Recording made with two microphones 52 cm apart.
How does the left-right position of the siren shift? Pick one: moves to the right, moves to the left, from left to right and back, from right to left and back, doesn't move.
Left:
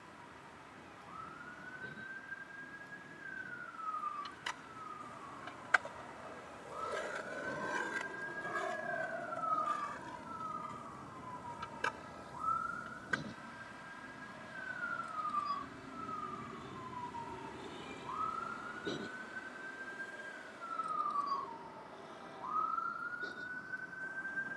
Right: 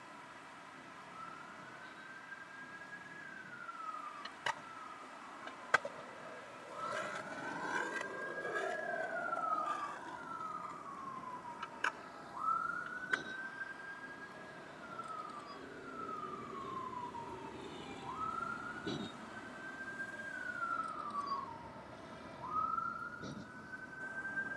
moves to the right.